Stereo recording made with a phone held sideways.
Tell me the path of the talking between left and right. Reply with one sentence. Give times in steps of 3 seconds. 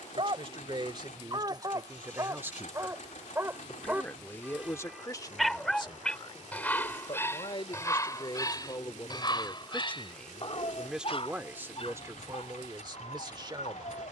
In this clip you hear the talking on the right from 0 s, on the left from 3 s, in the centre from 9 s and on the right from 12 s.